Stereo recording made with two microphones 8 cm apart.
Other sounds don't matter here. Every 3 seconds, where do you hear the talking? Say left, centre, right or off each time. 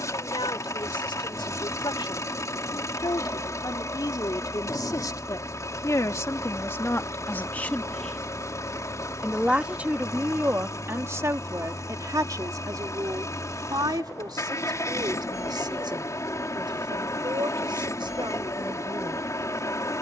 left, left, left, right, right, right, right.